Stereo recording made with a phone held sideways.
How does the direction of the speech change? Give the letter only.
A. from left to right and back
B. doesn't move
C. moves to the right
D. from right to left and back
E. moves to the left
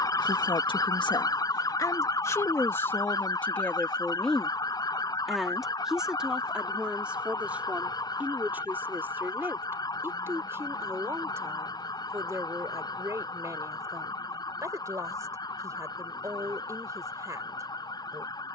C.